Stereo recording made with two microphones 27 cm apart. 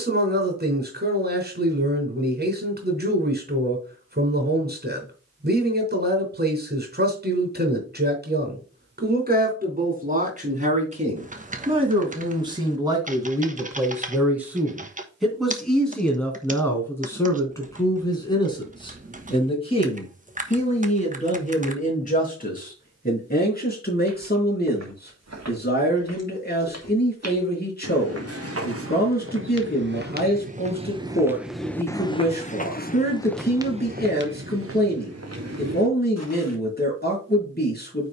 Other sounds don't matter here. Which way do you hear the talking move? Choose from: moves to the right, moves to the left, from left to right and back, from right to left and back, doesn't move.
moves to the left.